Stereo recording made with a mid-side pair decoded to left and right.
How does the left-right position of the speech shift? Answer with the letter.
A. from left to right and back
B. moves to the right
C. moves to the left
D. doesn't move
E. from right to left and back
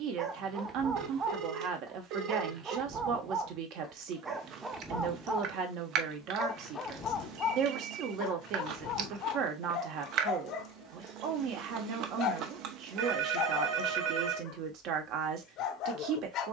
D.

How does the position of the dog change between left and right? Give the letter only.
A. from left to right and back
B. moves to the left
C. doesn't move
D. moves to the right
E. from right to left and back
B.